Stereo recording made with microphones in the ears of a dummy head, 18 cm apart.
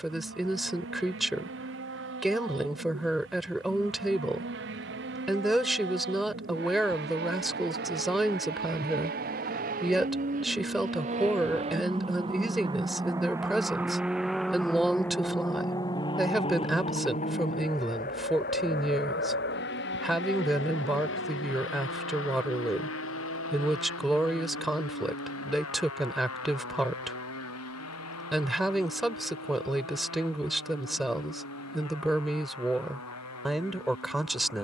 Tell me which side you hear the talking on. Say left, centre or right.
centre.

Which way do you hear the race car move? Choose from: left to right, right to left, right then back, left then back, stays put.
right to left.